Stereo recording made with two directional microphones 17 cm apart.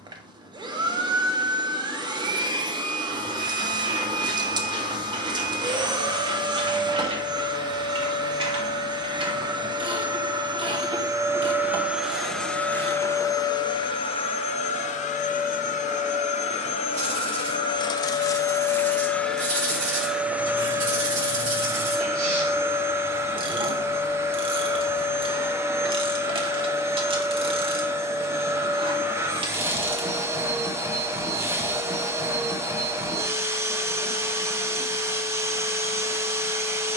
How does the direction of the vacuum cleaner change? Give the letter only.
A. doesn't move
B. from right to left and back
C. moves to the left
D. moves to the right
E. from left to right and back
B.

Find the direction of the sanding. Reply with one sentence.
In this clip you hear the sanding on the right.